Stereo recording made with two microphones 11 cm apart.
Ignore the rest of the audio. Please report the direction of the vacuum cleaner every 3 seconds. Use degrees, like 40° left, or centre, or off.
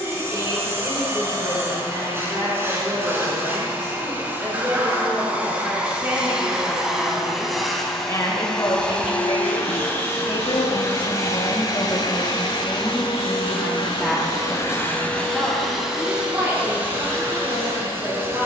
20° right, 20° right, centre, 30° left, 50° left, 10° right.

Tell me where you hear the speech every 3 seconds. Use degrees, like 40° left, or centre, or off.
30° right, 30° right, 10° left, 50° left, 10° left, 20° right.